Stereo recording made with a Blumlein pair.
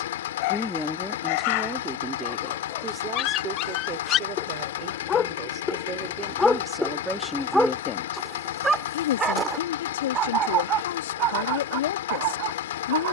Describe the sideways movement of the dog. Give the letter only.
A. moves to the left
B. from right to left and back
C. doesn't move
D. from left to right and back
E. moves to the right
E.